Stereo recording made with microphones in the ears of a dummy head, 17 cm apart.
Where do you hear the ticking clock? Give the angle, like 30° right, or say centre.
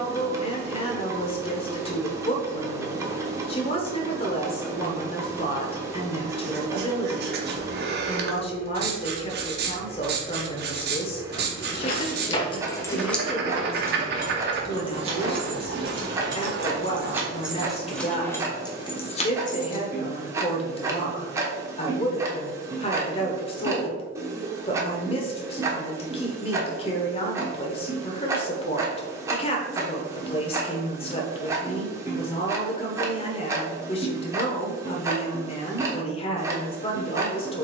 20° right.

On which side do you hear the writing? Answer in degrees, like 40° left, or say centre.
60° right.